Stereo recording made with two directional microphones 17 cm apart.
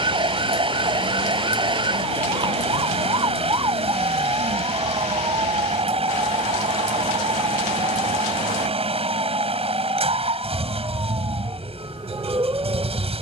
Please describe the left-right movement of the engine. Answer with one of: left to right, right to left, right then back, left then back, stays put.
stays put.